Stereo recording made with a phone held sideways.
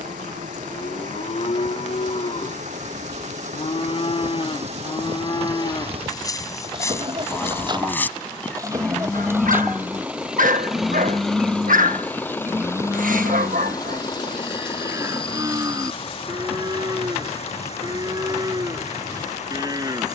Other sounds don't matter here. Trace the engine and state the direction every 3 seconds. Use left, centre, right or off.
right, right, right, centre, left, left, left.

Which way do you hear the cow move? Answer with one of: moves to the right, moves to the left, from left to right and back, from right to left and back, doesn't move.
moves to the right.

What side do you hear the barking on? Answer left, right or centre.
right.